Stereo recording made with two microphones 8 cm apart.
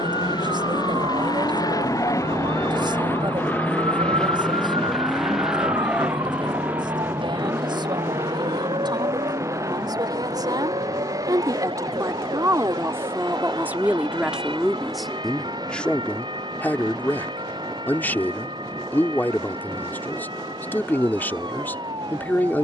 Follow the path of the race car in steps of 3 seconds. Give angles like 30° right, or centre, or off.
50° left, 10° left, 30° right, 40° right, 50° right, 50° right, 50° right, 50° right.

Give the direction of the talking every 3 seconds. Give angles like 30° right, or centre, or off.
70° right, 70° right, 70° right, 60° right, 20° right, 20° left, 20° left, 20° left.